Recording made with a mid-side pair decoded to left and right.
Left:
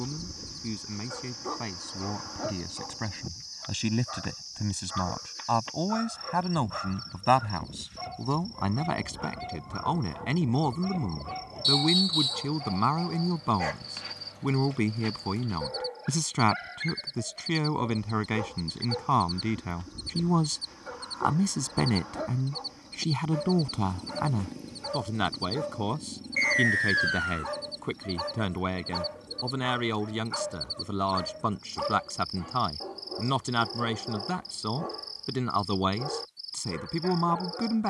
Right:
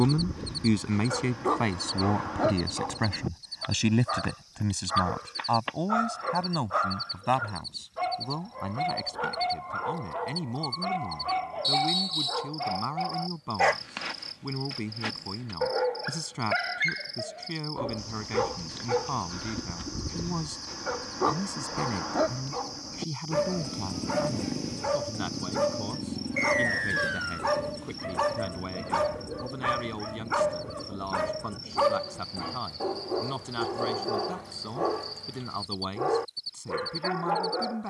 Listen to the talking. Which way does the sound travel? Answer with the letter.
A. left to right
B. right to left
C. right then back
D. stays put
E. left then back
B.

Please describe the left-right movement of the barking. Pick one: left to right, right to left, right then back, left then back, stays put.
stays put.